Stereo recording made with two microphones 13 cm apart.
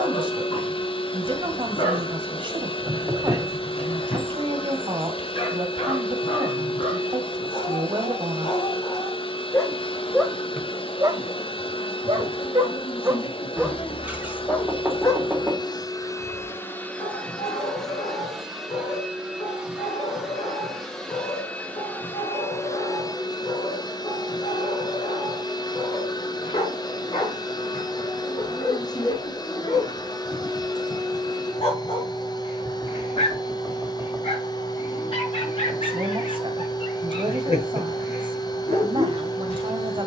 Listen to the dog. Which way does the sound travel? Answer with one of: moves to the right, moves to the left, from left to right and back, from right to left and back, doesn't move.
from left to right and back.